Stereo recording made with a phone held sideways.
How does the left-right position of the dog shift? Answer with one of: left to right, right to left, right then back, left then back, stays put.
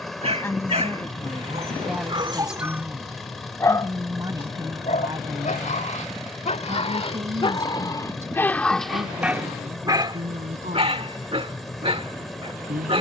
left then back.